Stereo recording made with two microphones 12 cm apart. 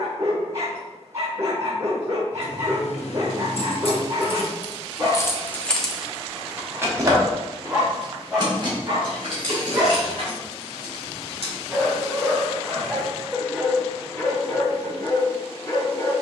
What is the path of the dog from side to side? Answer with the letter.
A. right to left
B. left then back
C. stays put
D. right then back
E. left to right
A.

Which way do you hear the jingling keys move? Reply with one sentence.
You can hear the jingling keys travel towards the right.